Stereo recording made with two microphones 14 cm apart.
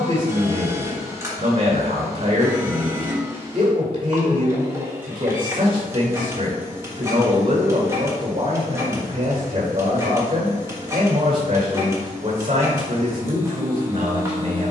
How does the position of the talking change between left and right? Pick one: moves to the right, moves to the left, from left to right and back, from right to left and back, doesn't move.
doesn't move.